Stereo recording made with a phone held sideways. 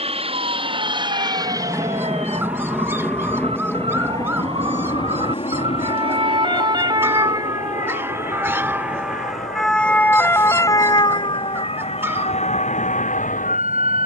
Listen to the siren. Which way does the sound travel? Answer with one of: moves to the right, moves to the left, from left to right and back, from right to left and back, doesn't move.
moves to the left.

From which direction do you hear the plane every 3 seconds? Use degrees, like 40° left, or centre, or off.
30° right, 30° left, 50° left, 60° left, 70° left.